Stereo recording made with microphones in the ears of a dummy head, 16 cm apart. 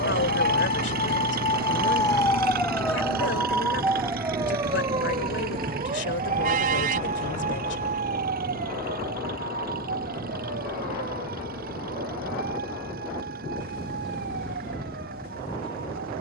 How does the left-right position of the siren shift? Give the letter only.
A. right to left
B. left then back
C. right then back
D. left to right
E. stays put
D.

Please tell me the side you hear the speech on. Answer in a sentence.
In this clip you hear the speech on the left.